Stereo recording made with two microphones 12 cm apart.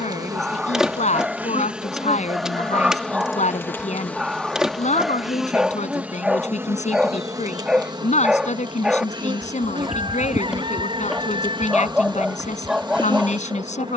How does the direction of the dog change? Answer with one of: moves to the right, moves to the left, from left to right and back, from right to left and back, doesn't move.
doesn't move.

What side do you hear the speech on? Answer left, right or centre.
left.